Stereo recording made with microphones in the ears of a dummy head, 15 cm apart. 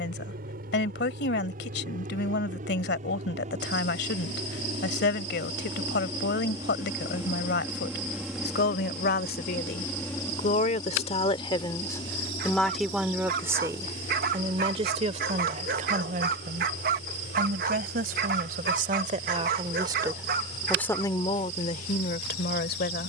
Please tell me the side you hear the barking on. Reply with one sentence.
You can hear the barking on the right.